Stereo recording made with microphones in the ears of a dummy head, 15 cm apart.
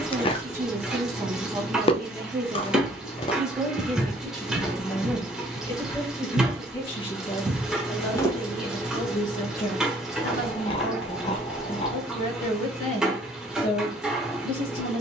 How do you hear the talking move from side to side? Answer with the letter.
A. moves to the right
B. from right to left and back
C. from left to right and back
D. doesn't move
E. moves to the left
E.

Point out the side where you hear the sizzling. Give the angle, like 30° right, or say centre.
centre.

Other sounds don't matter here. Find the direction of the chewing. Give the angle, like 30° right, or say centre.
30° left.